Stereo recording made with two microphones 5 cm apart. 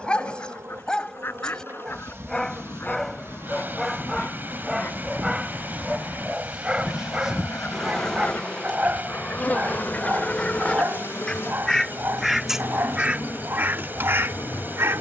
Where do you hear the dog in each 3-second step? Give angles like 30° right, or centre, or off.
20° left, centre, 20° right, 40° right, 50° right.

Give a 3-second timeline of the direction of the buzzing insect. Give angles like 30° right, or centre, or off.
60° right, 50° right, centre, 50° left, 60° left.